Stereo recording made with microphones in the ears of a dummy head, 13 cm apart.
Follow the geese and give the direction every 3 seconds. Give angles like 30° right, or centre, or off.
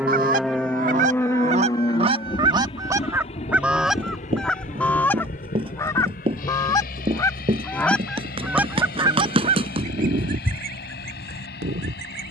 50° right, centre, 10° left, 60° right.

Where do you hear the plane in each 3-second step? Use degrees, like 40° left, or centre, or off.
20° left, 50° left, 60° left, 60° left.